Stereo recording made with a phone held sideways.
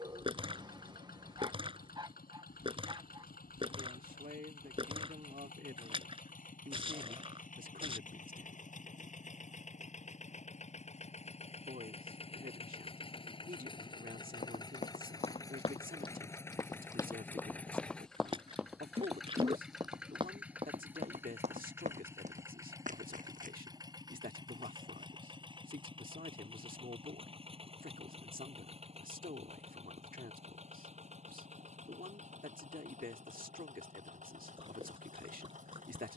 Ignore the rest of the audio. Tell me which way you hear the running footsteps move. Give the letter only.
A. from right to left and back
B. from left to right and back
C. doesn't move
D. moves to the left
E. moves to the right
E.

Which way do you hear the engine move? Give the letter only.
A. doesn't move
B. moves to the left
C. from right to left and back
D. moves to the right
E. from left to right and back
D.